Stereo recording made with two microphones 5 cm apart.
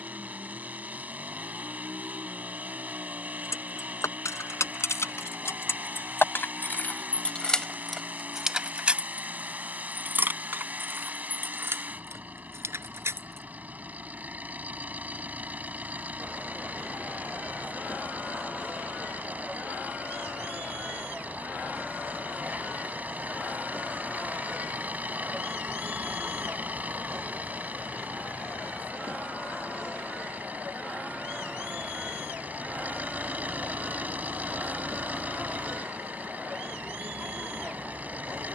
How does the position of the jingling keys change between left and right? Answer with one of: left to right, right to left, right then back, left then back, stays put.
left to right.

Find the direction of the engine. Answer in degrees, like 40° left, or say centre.
40° right.